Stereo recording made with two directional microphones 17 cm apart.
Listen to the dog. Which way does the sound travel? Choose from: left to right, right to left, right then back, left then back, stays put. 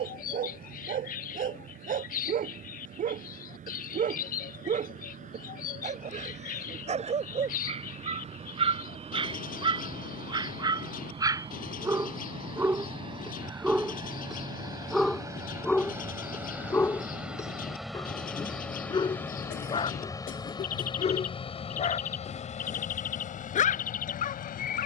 right to left.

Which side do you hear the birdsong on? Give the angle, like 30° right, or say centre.
50° left.